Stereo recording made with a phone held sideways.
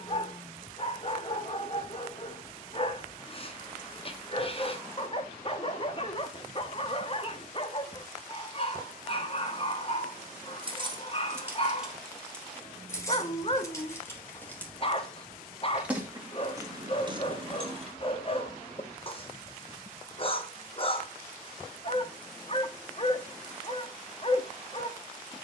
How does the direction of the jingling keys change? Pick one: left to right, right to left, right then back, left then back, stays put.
left then back.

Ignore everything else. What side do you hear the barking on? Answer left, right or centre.
left.